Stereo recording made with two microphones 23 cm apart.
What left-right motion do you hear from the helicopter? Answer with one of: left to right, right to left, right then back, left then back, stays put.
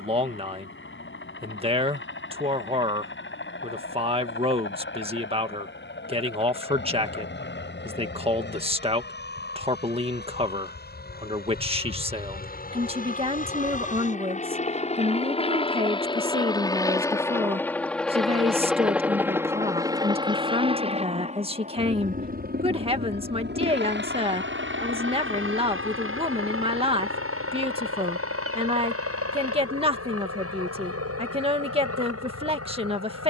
left to right.